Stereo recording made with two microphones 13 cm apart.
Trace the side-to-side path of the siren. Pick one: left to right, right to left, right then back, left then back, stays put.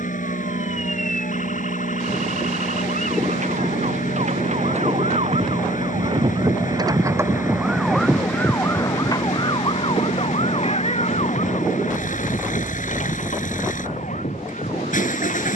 right to left.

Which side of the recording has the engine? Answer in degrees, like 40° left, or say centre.
80° left.